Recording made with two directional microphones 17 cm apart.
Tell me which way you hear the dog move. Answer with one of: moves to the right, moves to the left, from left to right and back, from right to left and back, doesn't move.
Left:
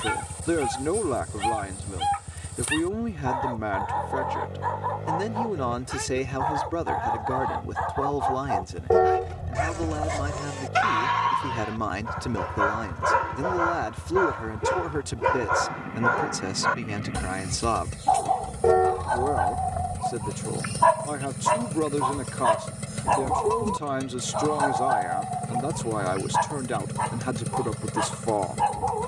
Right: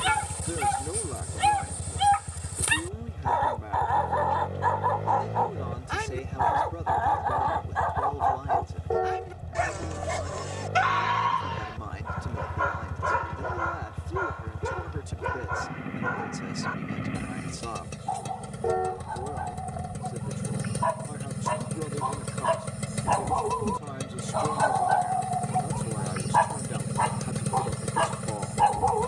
from right to left and back.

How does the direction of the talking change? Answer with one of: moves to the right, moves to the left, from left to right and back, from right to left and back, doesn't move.
doesn't move.